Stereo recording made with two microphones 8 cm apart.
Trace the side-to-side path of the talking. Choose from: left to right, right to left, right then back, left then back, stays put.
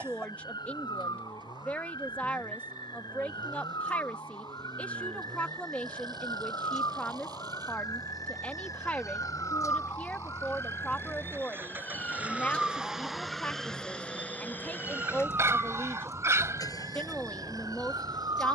stays put.